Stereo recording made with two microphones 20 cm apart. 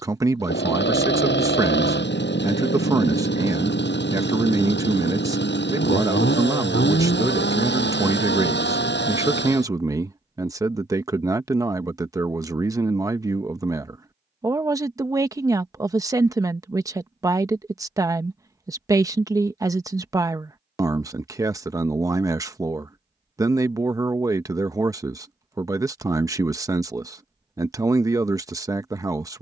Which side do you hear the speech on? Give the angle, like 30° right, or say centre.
20° right.